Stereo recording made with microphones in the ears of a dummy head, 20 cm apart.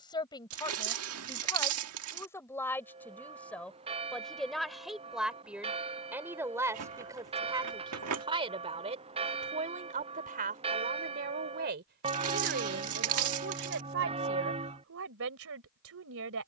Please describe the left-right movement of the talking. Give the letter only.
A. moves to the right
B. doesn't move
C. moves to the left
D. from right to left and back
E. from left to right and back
A.